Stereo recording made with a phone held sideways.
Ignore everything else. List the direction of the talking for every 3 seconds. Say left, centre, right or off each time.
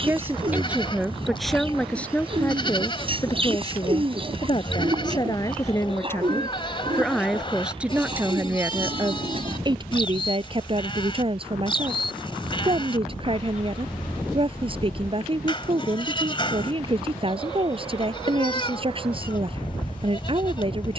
centre, left, centre, right, right, right, right.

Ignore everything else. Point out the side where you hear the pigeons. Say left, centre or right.
right.